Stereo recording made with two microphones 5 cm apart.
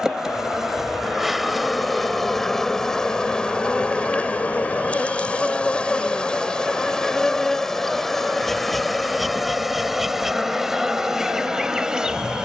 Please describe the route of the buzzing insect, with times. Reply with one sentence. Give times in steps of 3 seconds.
In this clip you hear the buzzing insect in the centre from 0 s, on the left from 3 s and in the centre from 6 s.